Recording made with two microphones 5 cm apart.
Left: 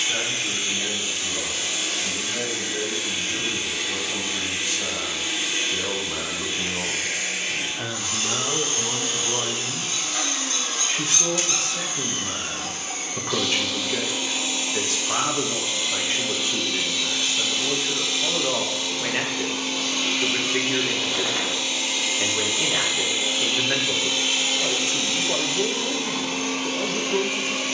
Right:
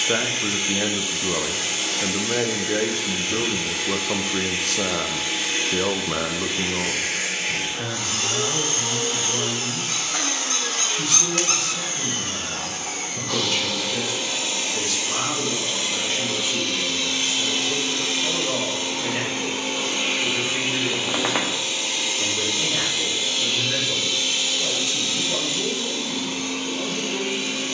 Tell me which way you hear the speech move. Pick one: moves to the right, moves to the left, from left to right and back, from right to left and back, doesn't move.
moves to the left.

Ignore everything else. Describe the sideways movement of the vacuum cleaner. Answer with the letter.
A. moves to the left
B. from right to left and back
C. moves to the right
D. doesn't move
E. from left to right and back
A.